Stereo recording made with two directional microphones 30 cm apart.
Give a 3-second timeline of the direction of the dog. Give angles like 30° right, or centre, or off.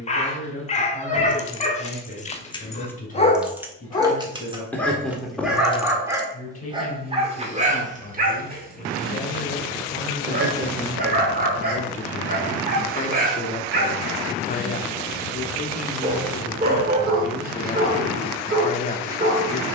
20° left, 10° left, 20° right, 30° right, 30° right, 30° right, 30° right.